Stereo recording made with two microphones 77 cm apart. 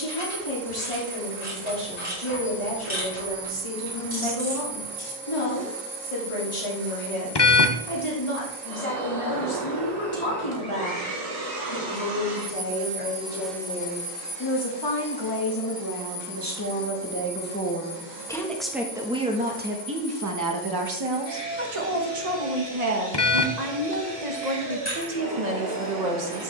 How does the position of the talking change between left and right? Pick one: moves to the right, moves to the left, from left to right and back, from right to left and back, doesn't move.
moves to the right.